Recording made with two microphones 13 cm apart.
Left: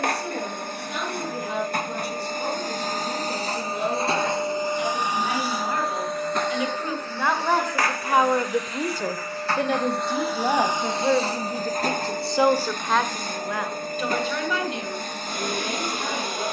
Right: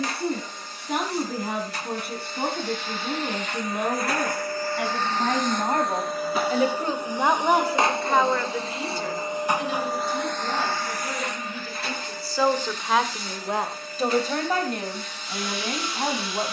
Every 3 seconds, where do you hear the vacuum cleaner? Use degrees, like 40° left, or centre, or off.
50° left, 20° left, 20° right, 10° left, 50° left, 50° left.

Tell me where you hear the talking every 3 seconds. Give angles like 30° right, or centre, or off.
60° right, 50° right, 10° right, 60° left, 20° right, 50° right.